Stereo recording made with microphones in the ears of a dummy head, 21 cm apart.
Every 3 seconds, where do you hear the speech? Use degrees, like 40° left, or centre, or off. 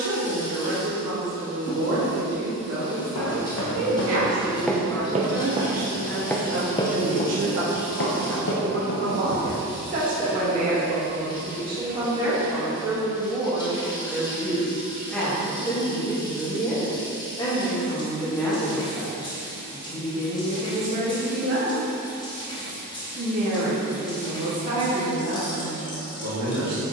80° right, 70° right, 50° right, 30° right, 10° right, 10° left, 10° right, 50° right, 70° right.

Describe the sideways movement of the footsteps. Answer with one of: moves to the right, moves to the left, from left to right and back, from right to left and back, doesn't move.
from left to right and back.